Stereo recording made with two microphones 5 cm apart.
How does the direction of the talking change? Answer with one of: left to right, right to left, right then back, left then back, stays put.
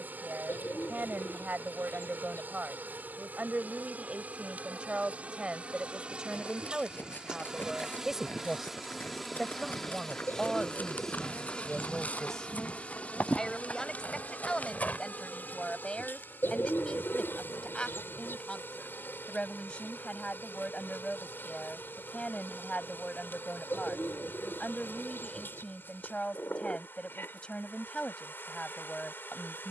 right to left.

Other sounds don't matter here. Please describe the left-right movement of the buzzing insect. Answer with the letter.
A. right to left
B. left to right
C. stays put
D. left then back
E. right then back
A.